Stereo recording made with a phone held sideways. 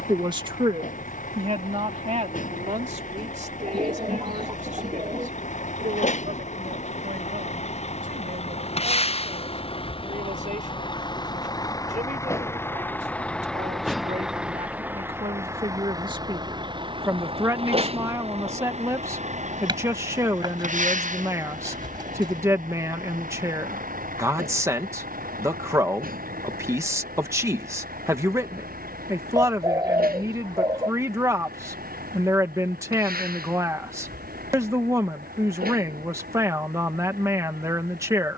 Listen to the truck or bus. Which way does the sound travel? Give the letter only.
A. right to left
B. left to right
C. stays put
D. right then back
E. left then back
B.